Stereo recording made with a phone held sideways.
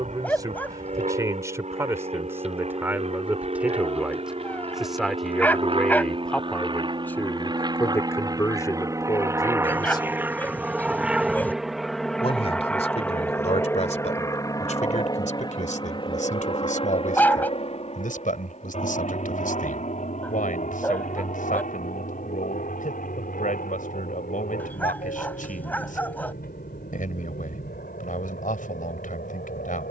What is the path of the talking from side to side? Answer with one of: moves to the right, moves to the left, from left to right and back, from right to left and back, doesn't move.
moves to the left.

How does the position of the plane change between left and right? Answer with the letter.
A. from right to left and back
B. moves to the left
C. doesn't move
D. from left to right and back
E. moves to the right
B.